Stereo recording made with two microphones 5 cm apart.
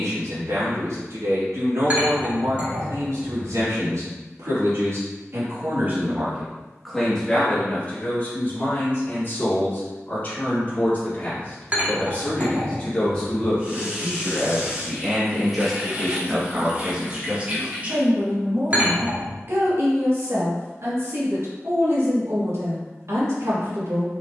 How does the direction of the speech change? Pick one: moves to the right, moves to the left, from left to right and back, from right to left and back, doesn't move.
from right to left and back.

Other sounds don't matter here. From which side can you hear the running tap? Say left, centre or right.
right.